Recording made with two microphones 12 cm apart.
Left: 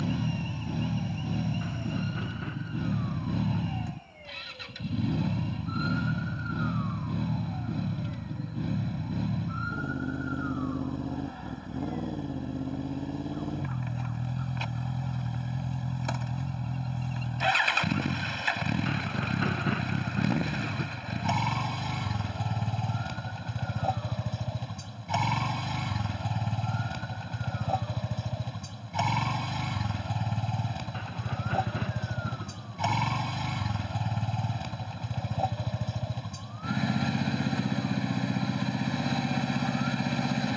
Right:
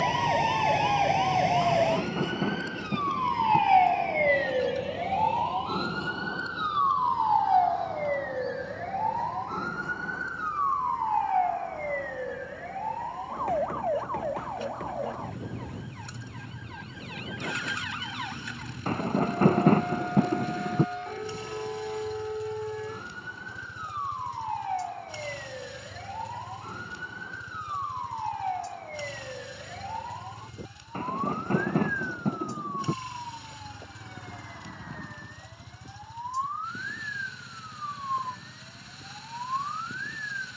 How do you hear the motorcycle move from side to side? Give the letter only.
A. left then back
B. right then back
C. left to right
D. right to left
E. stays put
E.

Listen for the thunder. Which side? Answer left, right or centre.
right.